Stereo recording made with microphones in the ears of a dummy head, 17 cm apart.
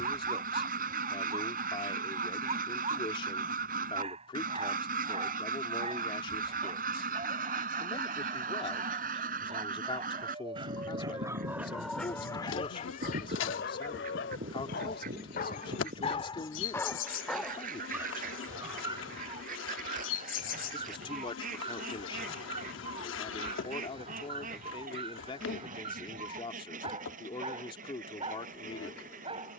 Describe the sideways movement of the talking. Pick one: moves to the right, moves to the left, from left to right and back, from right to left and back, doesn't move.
doesn't move.